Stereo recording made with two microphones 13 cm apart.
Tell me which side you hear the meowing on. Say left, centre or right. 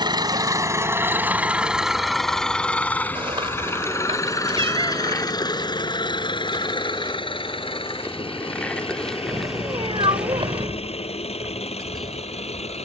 right.